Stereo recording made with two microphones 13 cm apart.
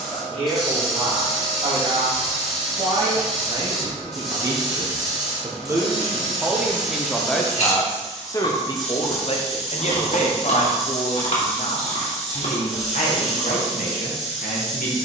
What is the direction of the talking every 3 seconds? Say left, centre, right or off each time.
right, right, centre, left, left.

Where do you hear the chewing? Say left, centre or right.
left.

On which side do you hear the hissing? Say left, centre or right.
centre.